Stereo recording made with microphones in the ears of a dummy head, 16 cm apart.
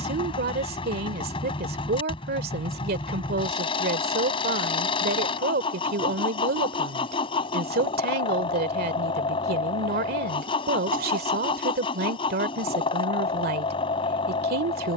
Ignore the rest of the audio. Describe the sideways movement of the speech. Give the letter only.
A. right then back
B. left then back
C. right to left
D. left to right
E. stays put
E.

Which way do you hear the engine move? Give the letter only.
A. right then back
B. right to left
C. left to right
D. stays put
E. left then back
D.